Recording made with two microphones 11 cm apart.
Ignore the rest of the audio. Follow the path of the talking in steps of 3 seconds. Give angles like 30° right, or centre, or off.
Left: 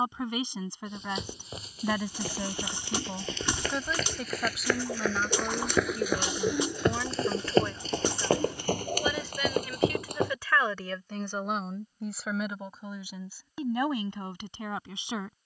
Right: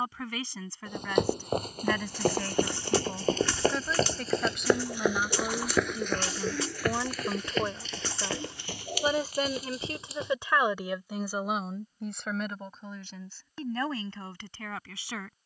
20° left, centre, 20° right, 20° right, 10° left.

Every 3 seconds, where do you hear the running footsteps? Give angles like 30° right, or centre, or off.
60° right, 30° right, 30° left, 60° left, off.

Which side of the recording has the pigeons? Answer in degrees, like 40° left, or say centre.
20° left.